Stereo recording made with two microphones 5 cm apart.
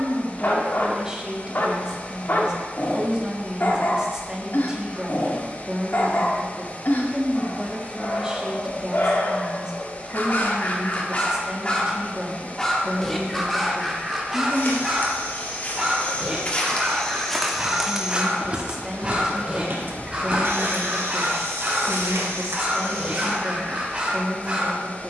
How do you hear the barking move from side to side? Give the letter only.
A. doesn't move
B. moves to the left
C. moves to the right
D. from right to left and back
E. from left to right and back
C.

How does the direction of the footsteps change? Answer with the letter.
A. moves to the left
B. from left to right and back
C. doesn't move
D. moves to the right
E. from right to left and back
D.